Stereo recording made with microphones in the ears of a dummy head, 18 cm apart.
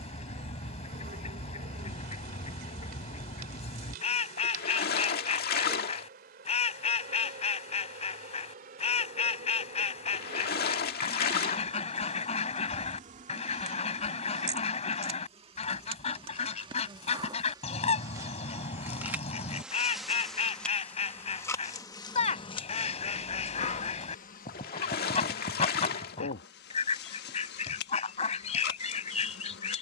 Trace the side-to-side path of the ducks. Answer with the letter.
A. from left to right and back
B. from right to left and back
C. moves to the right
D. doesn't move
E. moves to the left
D.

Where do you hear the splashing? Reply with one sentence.
You can hear the splashing on the left.